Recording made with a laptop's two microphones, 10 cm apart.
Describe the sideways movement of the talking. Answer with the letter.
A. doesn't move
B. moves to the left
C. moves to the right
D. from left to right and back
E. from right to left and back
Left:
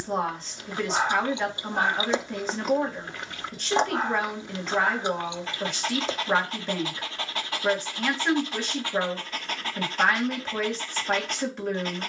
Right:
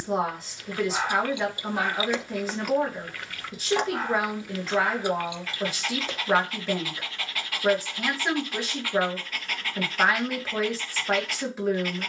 A.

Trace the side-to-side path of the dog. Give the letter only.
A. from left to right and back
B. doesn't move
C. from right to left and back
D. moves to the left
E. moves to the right
B.